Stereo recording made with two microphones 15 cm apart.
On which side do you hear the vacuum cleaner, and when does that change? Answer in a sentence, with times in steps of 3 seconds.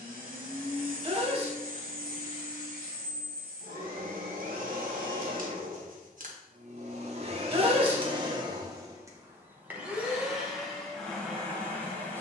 You can hear the vacuum cleaner on the right from 0 s and in the centre from 9 s.